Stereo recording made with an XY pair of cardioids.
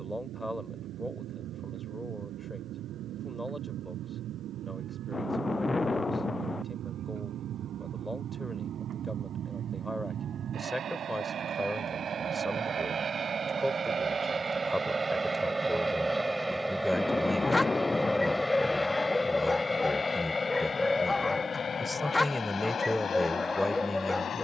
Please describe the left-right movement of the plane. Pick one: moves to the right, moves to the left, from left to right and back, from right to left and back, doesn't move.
moves to the left.